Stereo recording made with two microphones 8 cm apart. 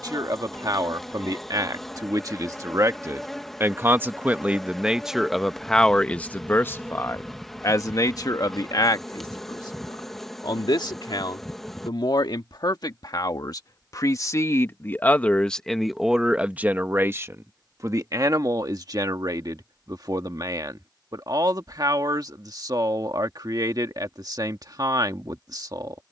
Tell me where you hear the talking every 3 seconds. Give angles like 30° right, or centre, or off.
50° right, 10° right, 40° left, 60° left, 50° left, 10° right, 50° right, 50° right, 50° right.